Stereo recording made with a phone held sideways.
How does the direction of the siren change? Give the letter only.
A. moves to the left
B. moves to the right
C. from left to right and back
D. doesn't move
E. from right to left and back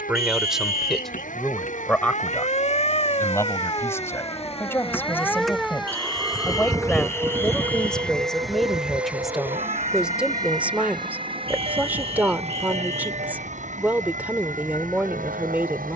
B.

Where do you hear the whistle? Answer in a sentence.
In this clip you hear the whistle on the left.